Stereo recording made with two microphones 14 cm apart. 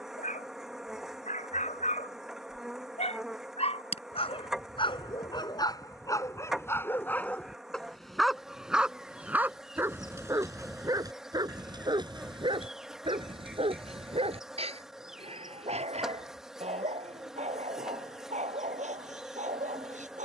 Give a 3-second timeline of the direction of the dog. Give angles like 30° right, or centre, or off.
60° left, 40° left, 10° left, 20° right, 40° right, 50° right, 60° right.